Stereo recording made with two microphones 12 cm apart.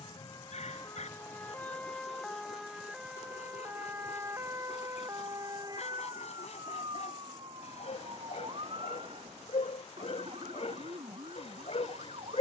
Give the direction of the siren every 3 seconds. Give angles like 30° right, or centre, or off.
10° left, 20° right, 40° right, 50° right.